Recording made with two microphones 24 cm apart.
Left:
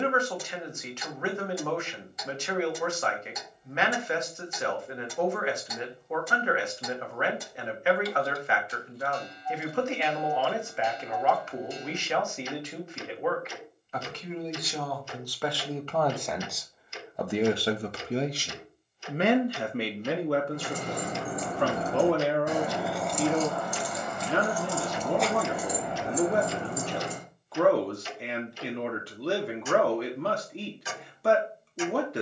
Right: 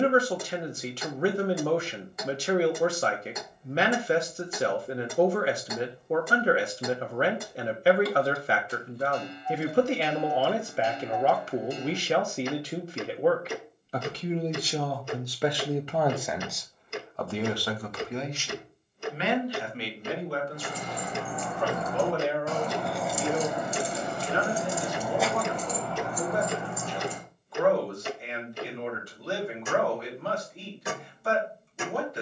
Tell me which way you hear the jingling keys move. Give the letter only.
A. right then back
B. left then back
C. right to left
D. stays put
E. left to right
A.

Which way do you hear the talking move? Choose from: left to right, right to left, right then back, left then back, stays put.
right to left.